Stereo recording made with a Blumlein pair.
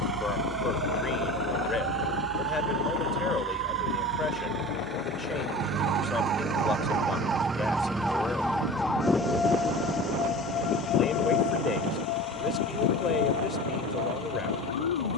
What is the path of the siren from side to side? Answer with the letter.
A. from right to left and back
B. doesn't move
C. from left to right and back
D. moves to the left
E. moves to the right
D.